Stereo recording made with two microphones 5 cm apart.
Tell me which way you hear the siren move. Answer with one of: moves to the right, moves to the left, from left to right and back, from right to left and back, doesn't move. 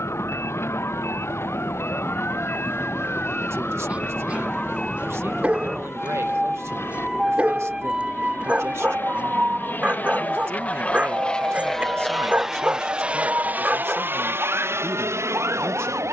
moves to the right.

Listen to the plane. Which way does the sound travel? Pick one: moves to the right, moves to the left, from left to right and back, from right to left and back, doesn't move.
moves to the right.